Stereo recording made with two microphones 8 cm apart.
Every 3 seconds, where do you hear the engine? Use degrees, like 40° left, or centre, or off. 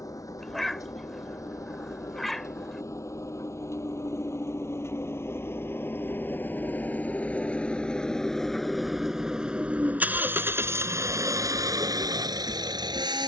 50° left, 40° left, 20° left, 30° right, 60° right.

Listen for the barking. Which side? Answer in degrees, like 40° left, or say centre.
centre.